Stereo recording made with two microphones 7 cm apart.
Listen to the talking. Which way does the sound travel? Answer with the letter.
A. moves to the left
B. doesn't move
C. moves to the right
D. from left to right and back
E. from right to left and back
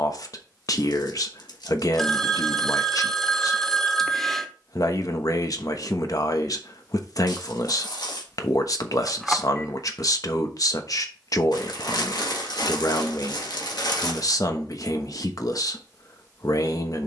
B.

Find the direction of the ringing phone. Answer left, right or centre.
centre.